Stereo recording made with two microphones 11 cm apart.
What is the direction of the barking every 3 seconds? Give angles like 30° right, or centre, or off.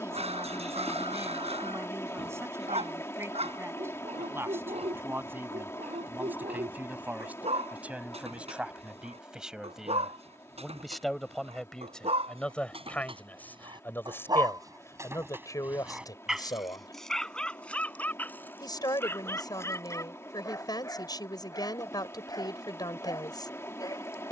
80° right, 80° right, 80° right, 80° right, 50° right, centre, 20° left, 30° left.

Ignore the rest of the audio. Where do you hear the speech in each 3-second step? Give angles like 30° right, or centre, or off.
20° right, 20° right, 10° right, centre, 20° left, 30° left, 40° left, 40° left.